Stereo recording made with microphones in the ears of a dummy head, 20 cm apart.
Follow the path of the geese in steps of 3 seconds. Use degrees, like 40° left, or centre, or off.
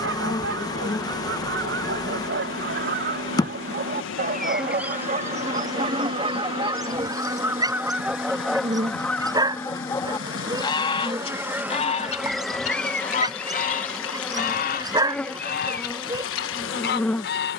60° right, 40° right, 10° right, 20° left, 40° left, 50° left.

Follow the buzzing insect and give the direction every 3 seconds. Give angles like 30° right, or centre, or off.
20° left, centre, 30° right, 10° right, centre, 10° left.